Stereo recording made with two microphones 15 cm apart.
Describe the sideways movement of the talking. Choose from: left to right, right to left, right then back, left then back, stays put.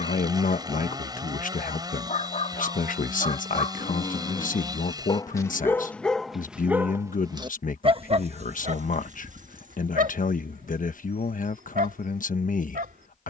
stays put.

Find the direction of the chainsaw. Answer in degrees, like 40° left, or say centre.
30° right.